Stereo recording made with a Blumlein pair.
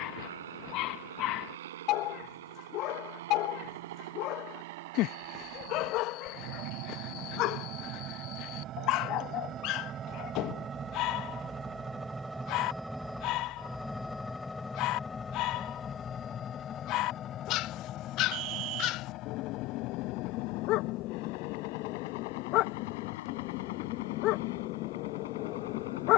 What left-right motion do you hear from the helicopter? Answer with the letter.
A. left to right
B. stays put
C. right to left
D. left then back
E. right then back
C.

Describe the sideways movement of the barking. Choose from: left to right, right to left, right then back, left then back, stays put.
stays put.